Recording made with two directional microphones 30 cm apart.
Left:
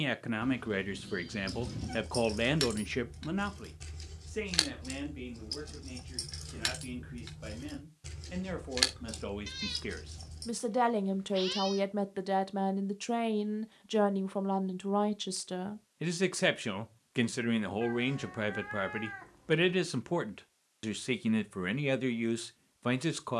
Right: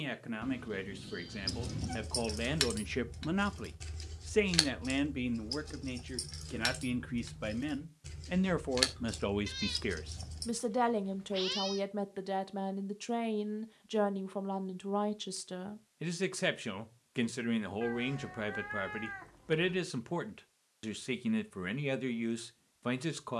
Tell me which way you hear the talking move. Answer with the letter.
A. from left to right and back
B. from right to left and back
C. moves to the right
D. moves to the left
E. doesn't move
A.